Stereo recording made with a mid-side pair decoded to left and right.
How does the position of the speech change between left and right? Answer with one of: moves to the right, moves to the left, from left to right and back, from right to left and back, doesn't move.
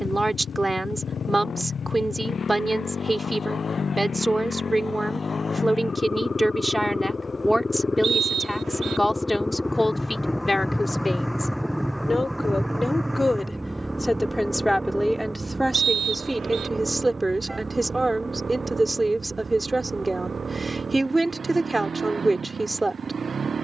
from right to left and back.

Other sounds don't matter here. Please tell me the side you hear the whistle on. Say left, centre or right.
right.